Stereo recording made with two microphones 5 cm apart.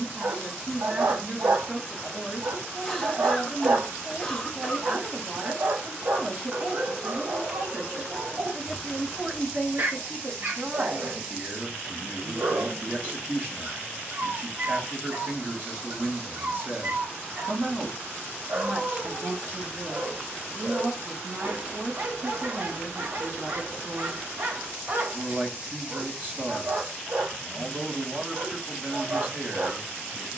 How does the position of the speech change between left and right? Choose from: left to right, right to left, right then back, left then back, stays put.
stays put.